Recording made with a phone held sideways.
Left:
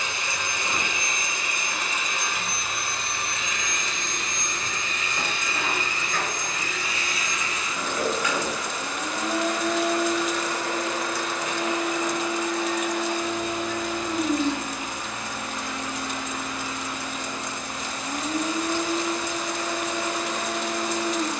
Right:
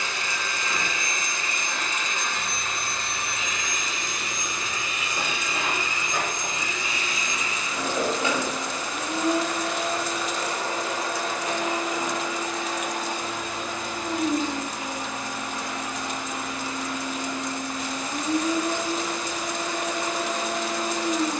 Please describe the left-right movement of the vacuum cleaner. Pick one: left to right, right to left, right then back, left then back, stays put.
left to right.